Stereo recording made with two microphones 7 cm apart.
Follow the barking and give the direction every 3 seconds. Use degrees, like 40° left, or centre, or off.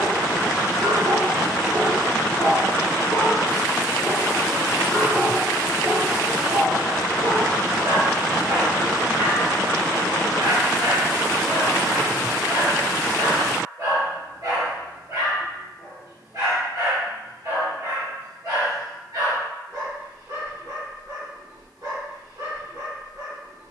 40° right, 10° right, 60° right, 60° right, 60° right, 60° right, 60° right, 60° right.